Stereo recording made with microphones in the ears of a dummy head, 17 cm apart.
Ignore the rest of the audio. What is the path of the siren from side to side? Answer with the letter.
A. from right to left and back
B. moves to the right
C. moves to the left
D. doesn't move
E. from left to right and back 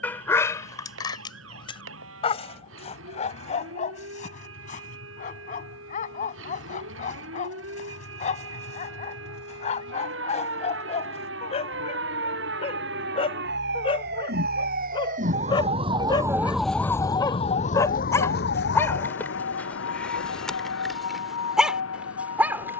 C.